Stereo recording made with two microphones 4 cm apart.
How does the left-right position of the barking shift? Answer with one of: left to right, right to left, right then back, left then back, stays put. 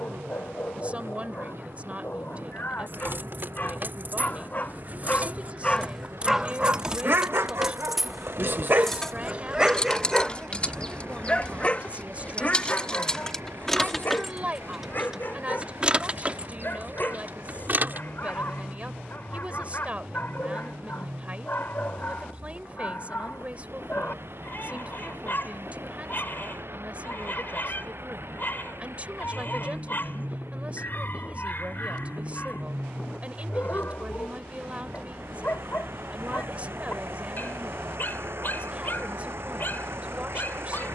right then back.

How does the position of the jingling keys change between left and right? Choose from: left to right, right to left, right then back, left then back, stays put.
left then back.